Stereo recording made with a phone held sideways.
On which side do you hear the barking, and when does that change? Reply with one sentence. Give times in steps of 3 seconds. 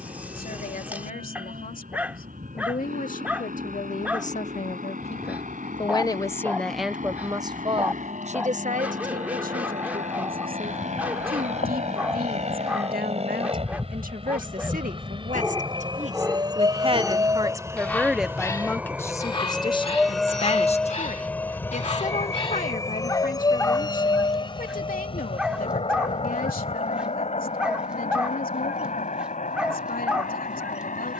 You can hear the barking in the centre from 0 s, on the left from 18 s and in the centre from 24 s.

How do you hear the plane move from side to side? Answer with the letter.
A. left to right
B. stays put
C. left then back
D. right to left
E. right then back
D.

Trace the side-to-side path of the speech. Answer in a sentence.
In this clip you hear the speech go right and come back.